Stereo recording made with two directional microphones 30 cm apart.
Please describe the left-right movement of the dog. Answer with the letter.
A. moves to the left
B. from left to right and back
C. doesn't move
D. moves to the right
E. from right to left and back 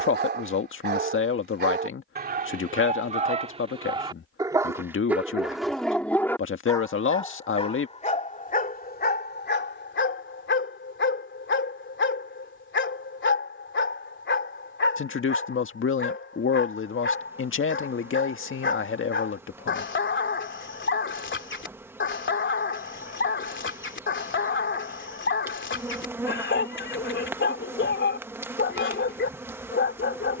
A.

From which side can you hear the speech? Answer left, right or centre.
left.